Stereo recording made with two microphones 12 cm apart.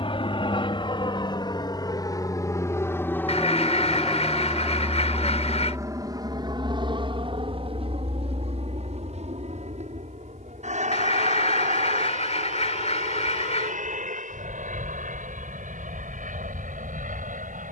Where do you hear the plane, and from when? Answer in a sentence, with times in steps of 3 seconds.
In this clip you hear the plane on the left from 0 s, in the centre from 3 s and on the right from 6 s.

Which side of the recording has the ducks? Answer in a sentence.
You can hear the ducks on the left.